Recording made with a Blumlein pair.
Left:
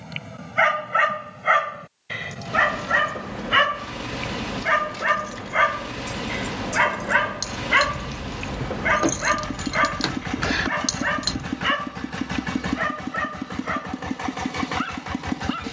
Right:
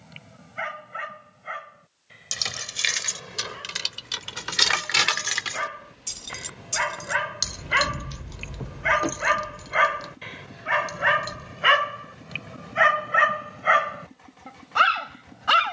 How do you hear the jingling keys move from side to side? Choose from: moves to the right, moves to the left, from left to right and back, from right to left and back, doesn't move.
moves to the left.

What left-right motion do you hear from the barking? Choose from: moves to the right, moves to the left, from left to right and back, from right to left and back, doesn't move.
moves to the right.